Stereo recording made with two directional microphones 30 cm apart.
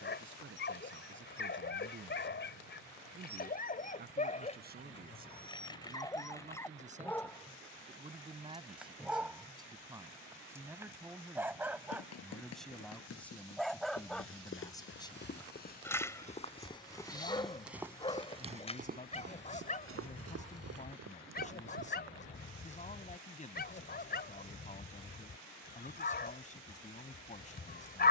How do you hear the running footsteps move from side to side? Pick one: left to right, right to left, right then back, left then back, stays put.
left to right.